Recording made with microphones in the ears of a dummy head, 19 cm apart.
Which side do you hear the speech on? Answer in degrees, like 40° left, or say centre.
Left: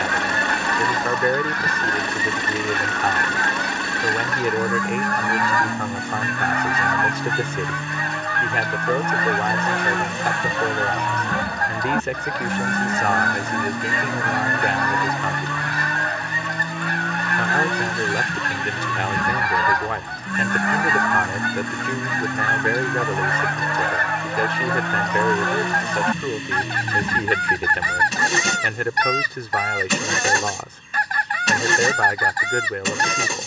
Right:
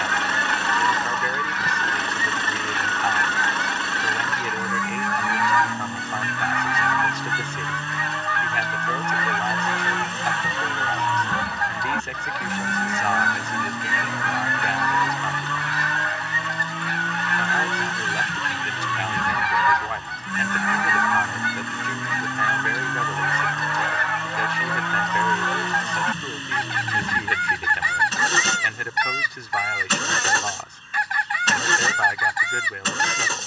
50° left.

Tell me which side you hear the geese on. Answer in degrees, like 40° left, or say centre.
40° left.